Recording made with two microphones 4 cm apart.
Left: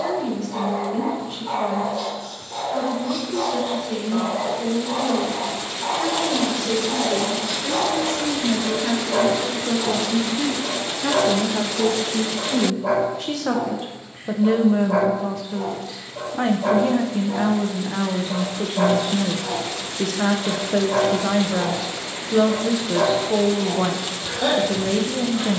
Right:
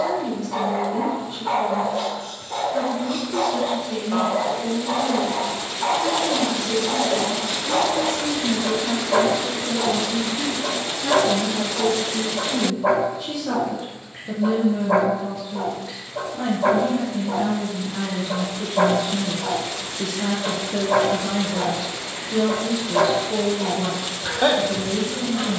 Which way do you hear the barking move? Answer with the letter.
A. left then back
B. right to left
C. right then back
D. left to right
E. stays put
E.